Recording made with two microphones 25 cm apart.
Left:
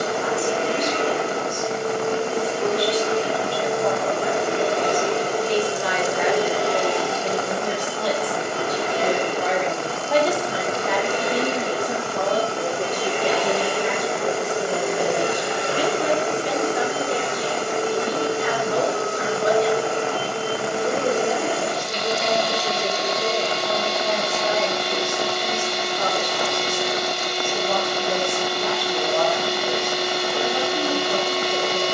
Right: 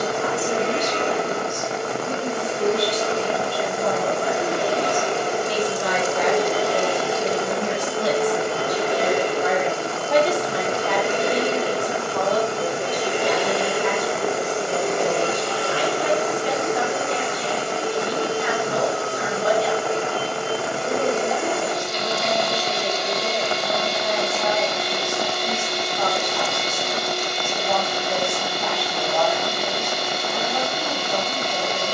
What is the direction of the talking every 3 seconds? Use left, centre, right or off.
right, right, right, centre, left, left, left, left, left, left, left.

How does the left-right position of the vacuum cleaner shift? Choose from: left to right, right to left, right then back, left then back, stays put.
right then back.